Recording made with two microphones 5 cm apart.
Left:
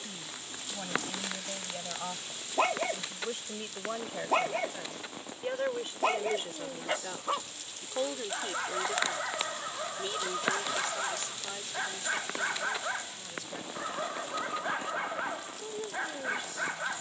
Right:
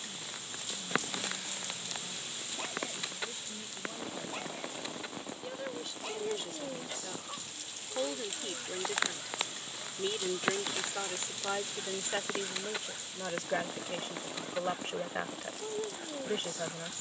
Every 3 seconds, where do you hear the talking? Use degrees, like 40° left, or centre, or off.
60° left, 40° left, 20° left, 20° right, 40° right, 50° right.